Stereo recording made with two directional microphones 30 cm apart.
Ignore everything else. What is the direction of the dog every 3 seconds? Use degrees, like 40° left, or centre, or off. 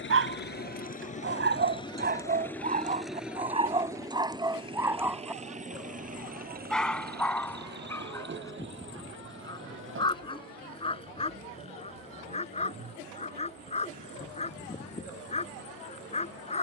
30° right, 10° right, 10° left, 20° left, 20° left, 20° left.